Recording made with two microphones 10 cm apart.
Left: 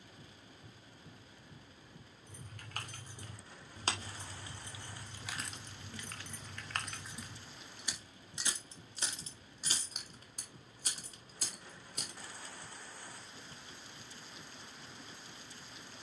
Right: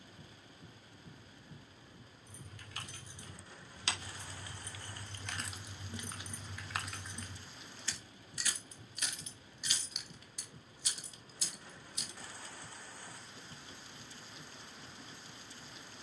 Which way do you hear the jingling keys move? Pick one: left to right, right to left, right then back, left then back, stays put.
right then back.